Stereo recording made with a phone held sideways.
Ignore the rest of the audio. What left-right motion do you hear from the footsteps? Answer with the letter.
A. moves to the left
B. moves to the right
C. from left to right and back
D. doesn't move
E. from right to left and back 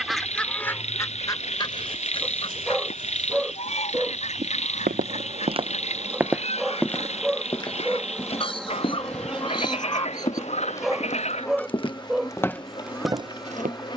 E.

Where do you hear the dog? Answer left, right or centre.
centre.